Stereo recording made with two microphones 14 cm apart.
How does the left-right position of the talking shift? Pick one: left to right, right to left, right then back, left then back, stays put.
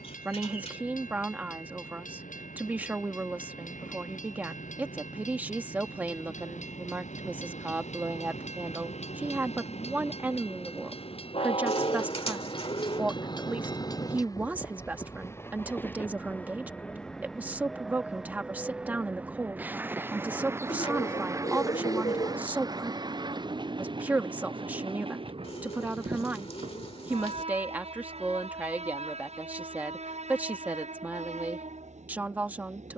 stays put.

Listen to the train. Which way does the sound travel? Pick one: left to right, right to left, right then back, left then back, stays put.
left to right.